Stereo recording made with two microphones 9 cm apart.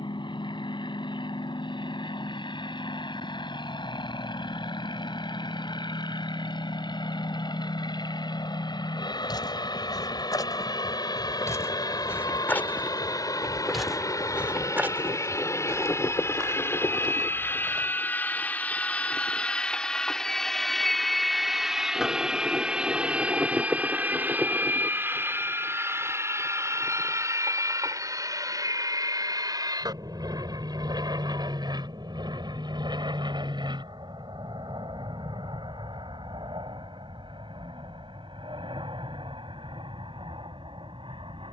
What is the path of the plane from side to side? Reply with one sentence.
In this clip you hear the plane go from the left side to the right.